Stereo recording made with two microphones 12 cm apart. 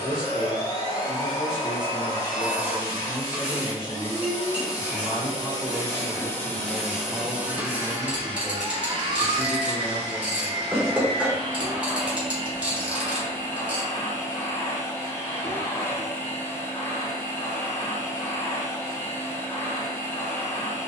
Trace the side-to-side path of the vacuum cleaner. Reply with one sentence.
In this clip you hear the vacuum cleaner go right and come back.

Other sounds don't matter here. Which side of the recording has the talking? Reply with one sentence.
You can hear the talking on the right.